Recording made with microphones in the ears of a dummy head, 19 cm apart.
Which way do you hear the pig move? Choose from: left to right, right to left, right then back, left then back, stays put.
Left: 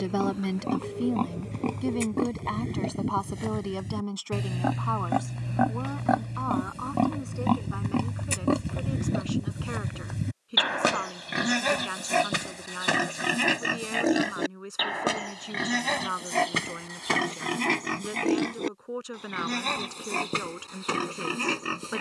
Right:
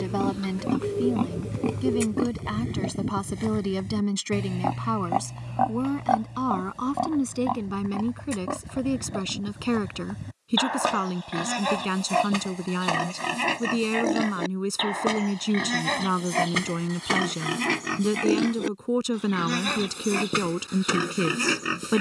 left then back.